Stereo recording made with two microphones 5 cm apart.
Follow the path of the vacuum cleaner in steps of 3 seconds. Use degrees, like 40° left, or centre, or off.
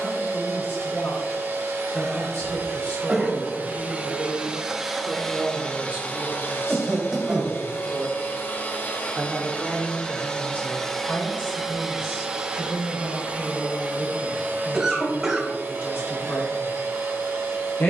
60° right, 10° right, 40° left, 10° left, 30° right, 50° right.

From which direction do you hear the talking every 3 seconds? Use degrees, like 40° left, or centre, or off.
50° left, centre, 40° right, 20° left, 50° left, 50° left.